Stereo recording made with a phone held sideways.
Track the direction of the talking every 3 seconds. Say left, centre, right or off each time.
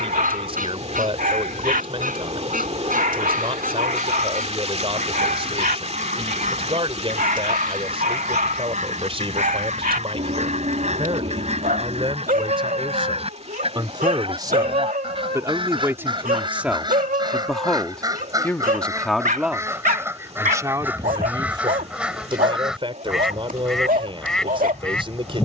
right, right, right, right, right, centre, centre, right, right.